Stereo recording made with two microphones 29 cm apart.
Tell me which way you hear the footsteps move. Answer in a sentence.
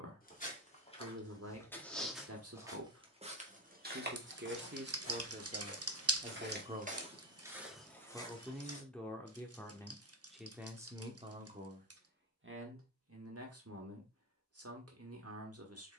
In this clip you hear the footsteps go right and come back.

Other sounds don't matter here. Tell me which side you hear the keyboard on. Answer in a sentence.
You can hear the keyboard on the right.